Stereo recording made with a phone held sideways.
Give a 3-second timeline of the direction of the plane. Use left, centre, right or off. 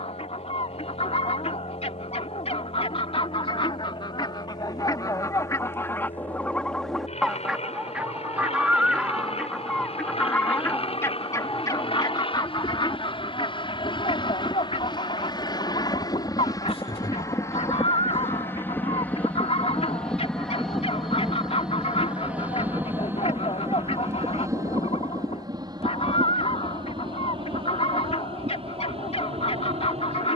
left, left, left, left, left, left, centre, centre, right, right.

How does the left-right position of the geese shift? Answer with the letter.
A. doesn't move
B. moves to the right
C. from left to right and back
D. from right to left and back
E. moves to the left
C.